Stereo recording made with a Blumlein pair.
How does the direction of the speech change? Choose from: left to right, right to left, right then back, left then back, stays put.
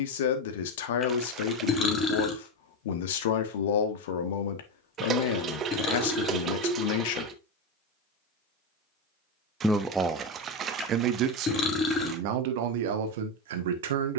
left to right.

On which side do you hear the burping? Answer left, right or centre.
left.